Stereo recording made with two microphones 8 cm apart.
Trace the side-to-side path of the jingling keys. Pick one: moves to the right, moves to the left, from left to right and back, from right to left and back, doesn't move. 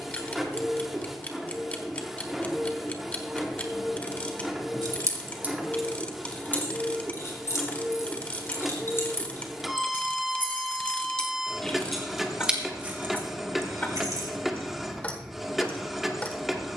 from right to left and back.